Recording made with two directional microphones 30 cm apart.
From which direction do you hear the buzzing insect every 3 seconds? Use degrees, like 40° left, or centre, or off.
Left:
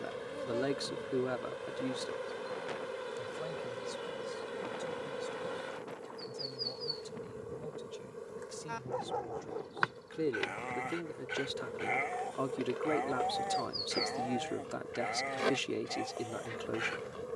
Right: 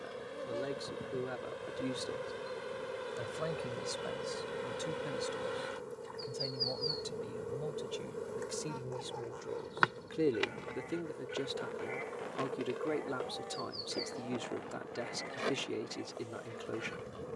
10° left, centre, 20° right, 10° right, 20° left, 20° left.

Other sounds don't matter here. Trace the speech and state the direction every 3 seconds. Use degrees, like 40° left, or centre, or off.
30° left, 50° right, 40° right, 10° right, 20° left, 20° left.